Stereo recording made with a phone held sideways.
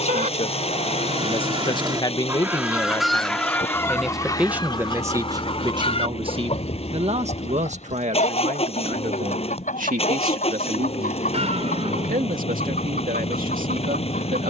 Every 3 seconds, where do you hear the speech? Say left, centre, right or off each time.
left, centre, right, right, right.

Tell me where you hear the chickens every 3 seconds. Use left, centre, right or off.
right, left, left, left, left.